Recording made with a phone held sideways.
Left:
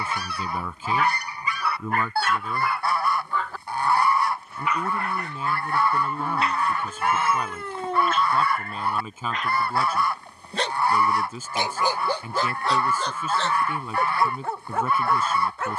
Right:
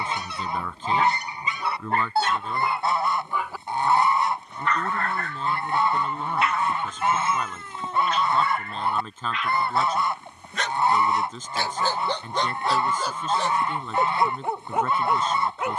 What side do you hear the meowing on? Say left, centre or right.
left.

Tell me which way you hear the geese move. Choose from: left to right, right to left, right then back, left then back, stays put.
stays put.